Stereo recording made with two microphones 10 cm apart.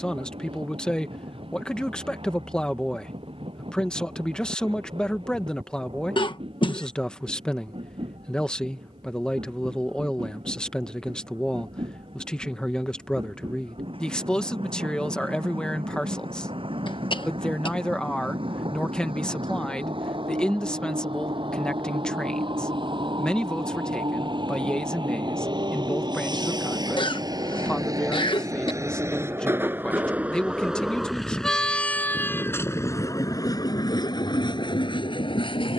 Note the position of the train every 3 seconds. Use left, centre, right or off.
right, right, right, right, right, right, right, right, right, right, centre, left.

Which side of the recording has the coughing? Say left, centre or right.
left.